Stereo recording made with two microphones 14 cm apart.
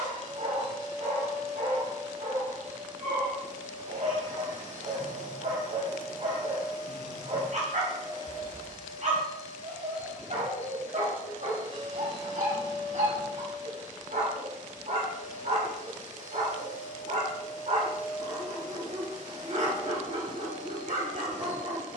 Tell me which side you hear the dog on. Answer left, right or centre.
right.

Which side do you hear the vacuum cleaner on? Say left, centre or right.
right.